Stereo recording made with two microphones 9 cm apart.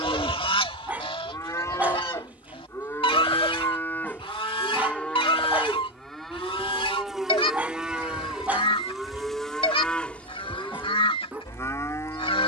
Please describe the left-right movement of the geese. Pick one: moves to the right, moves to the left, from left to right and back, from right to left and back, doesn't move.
doesn't move.